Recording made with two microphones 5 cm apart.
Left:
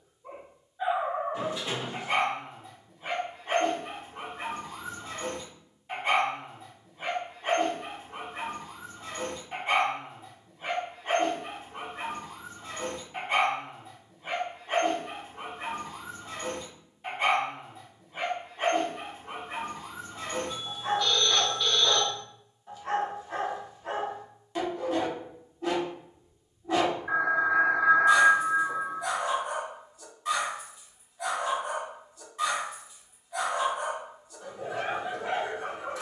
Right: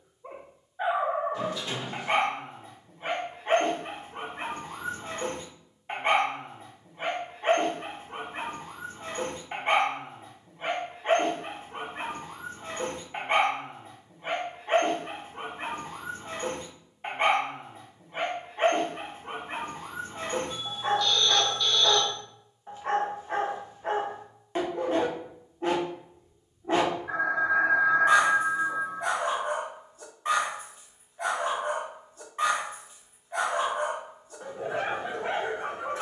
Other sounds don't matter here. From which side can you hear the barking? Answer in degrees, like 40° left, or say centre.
30° right.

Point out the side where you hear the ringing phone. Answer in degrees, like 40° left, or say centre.
20° left.